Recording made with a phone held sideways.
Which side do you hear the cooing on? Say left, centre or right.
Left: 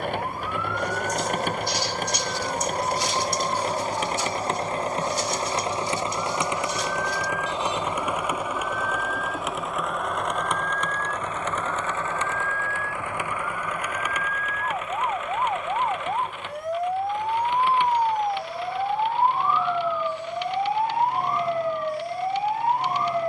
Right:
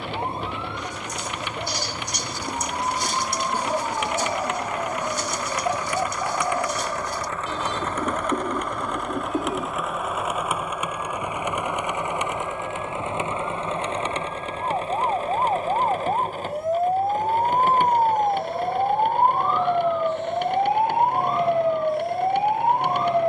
right.